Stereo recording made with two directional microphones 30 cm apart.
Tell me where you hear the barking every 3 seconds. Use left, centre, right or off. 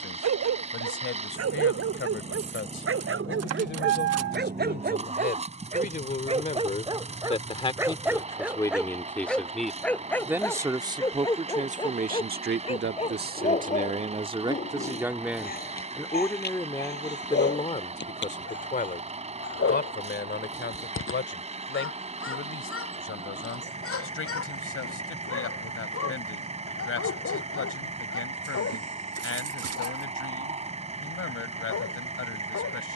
right, right, centre, centre, left, left, left, left, left, left, left.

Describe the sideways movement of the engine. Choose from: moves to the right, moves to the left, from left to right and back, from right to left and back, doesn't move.
doesn't move.